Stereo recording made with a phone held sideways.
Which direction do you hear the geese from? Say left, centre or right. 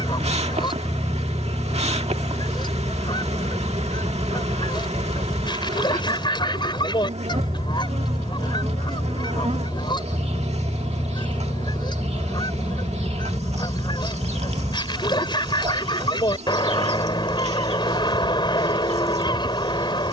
left.